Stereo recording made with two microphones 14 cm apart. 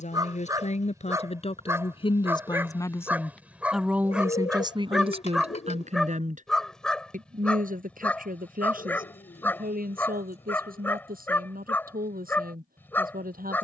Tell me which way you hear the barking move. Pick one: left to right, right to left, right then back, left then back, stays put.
right to left.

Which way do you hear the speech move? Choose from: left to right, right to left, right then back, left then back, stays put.
left to right.